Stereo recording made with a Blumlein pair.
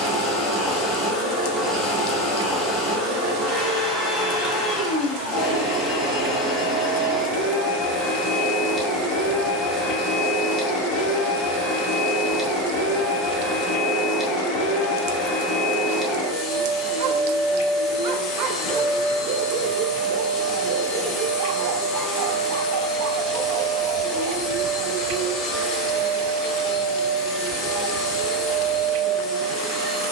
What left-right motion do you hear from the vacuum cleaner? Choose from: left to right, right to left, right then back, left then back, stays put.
stays put.